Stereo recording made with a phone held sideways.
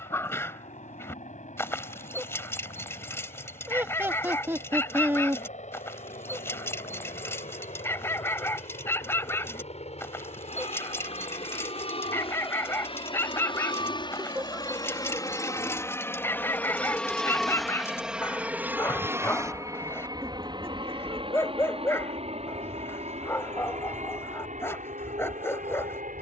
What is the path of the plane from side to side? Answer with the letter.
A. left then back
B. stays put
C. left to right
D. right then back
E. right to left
C.